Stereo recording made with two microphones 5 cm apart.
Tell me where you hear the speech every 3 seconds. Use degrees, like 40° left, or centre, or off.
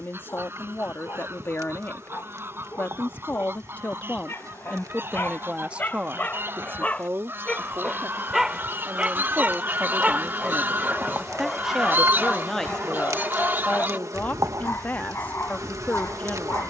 40° left, 10° left, 50° right, 30° right, 20° left, 30° left.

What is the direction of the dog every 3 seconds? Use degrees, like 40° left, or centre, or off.
50° left, 40° left, 10° left, 10° right, 40° left, 50° left.